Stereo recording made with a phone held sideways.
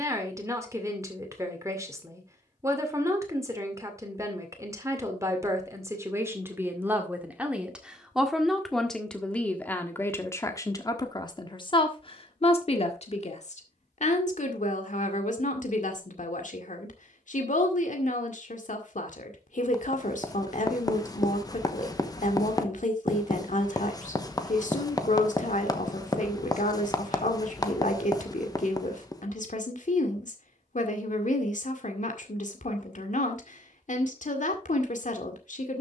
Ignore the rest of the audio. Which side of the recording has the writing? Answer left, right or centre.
left.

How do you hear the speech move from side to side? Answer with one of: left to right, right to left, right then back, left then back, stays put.
right to left.